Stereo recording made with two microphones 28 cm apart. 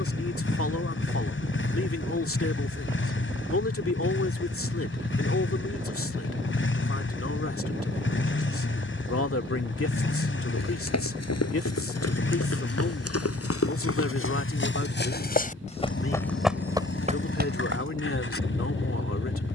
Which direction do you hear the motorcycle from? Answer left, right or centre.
left.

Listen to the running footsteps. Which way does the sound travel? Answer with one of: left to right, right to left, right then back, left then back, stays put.
left to right.